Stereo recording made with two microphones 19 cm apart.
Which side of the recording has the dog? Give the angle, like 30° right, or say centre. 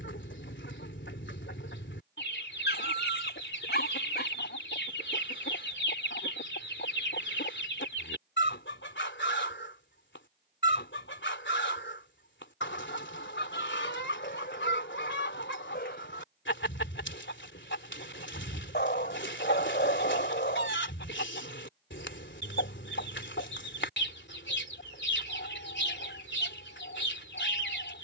60° left.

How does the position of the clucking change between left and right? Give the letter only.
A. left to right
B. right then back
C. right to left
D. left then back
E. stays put
E.